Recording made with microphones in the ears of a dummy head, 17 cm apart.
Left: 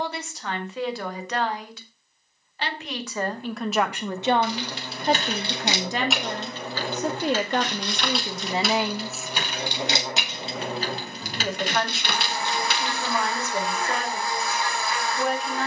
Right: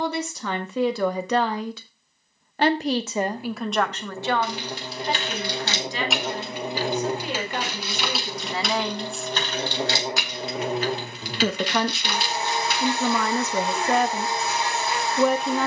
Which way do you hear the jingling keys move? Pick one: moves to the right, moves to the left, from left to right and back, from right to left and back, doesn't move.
from left to right and back.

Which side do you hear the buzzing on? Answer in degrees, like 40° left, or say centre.
20° right.